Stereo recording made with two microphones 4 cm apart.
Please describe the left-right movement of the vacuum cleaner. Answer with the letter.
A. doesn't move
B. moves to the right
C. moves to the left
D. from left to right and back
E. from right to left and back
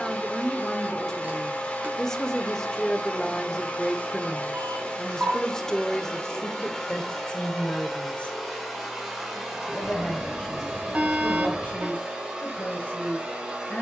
B.